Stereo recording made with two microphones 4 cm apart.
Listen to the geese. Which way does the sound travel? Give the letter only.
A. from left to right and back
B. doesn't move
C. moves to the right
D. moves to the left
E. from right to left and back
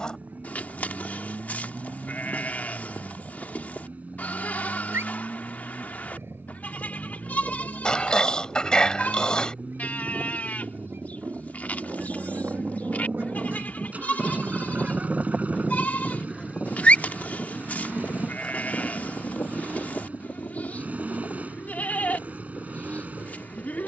D.